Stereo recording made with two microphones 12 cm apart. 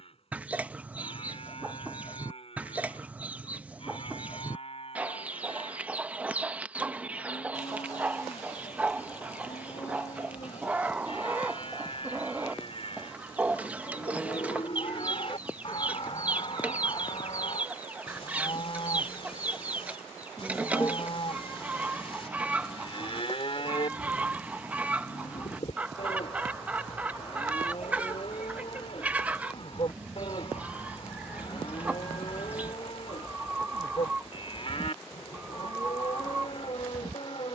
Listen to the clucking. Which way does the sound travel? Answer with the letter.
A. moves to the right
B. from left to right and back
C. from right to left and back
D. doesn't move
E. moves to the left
D.